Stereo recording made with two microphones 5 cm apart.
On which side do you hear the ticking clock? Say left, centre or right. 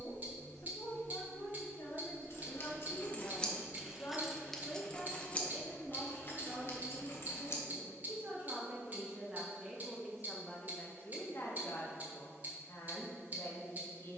right.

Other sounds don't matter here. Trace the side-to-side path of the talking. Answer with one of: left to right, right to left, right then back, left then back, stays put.
right then back.